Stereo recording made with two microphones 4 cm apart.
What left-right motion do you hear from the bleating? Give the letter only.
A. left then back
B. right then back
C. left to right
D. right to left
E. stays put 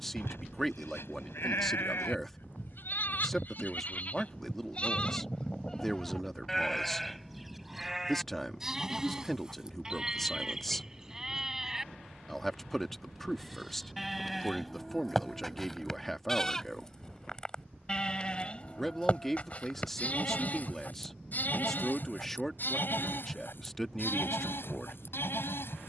B.